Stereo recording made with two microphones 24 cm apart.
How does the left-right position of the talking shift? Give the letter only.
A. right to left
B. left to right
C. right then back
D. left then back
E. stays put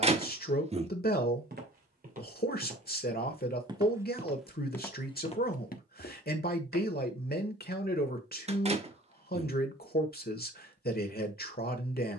E.